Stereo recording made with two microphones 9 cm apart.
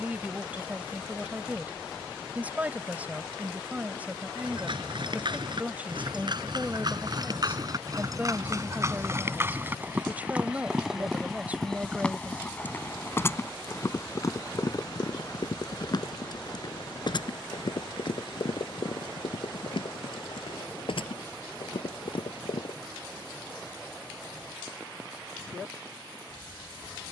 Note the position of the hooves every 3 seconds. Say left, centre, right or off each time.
off, right, right, centre, left, left, left, left, off.